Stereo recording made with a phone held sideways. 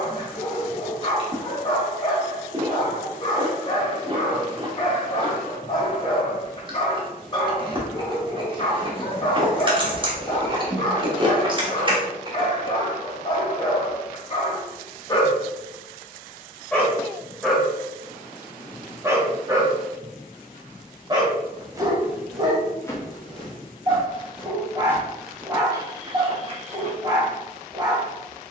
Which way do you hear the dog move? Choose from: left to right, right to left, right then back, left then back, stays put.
left to right.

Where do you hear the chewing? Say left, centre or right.
right.